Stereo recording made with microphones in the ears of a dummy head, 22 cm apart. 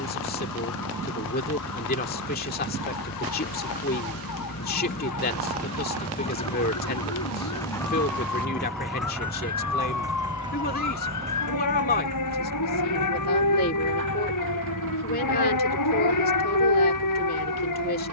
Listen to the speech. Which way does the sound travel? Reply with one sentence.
In this clip you hear the speech stay in one place.